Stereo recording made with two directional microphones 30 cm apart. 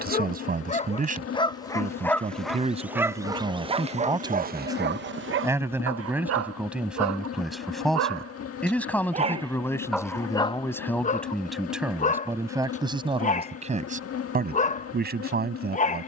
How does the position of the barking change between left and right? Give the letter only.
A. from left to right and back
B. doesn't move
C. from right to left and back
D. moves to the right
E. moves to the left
A.